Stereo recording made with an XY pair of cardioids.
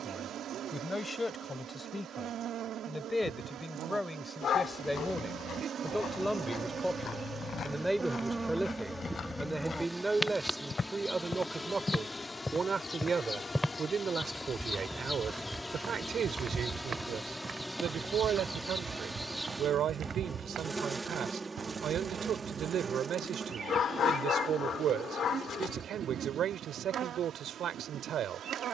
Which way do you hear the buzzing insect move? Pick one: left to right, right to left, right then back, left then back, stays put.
left then back.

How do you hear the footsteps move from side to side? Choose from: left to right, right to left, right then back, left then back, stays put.
left to right.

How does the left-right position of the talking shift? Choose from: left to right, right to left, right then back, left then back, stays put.
left to right.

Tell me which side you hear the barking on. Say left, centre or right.
left.